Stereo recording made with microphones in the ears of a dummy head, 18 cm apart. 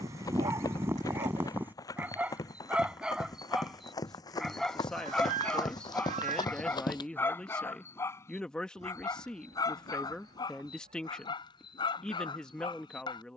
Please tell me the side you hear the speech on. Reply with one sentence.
You can hear the speech in the centre.